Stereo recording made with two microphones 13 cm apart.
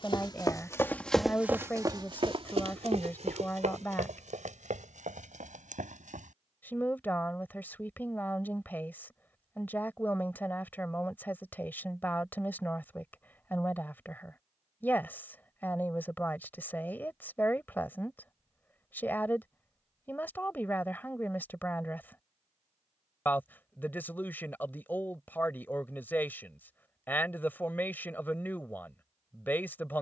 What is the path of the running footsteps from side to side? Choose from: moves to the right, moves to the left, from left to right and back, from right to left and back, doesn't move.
moves to the right.